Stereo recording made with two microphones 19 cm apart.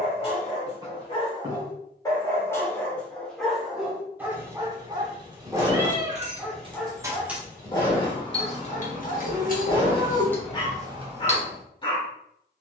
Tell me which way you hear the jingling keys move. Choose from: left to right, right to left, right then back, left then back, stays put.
left then back.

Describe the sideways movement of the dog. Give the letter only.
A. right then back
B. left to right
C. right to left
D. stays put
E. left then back
A.